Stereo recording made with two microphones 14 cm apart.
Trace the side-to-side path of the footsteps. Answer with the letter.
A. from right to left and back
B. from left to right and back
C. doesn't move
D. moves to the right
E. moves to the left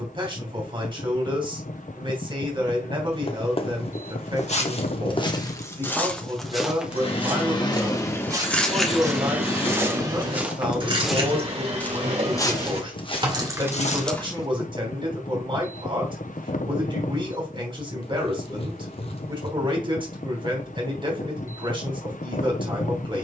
B.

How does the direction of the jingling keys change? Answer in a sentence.
In this clip you hear the jingling keys go right and come back.